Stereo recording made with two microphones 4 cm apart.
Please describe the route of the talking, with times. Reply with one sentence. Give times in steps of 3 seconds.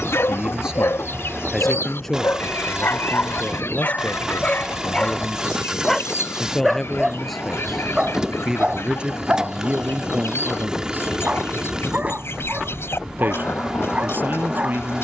In this clip you hear the talking in the centre from 0 s, on the left from 3 s, in the centre from 6 s and on the right from 9 s.